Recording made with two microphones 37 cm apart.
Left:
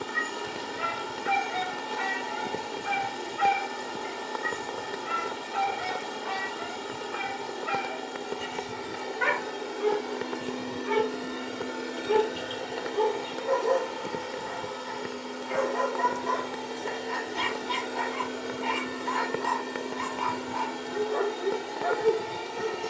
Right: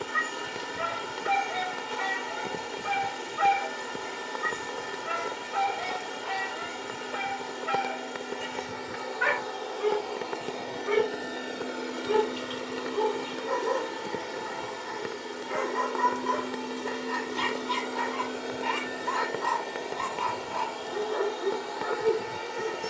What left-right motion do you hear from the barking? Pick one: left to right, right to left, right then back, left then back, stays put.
left to right.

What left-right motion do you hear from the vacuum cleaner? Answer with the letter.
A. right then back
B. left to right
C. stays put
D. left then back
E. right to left
A.